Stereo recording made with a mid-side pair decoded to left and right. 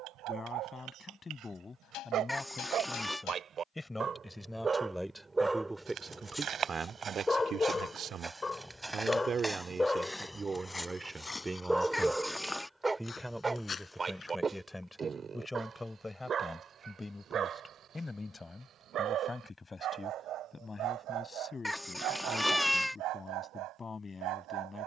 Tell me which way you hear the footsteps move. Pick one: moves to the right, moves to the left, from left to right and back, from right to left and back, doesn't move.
moves to the left.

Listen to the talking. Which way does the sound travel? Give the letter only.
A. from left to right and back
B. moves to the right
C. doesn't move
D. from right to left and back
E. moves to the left
A.